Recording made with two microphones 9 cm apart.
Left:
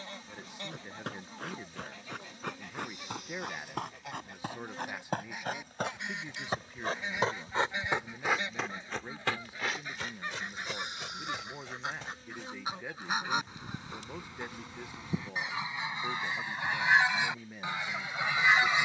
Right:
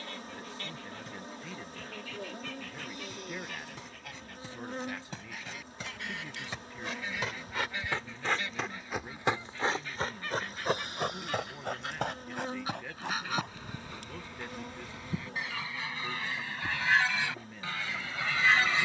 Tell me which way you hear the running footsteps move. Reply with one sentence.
In this clip you hear the running footsteps move to the right.